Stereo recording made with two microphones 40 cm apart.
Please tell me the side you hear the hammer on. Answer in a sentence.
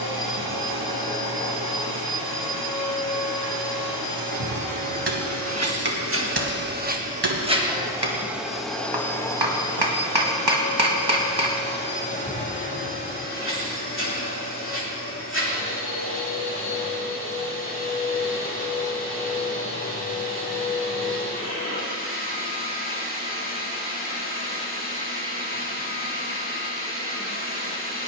You can hear the hammer on the right.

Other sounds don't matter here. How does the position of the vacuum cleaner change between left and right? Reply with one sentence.
You can hear the vacuum cleaner go from the right side to the left.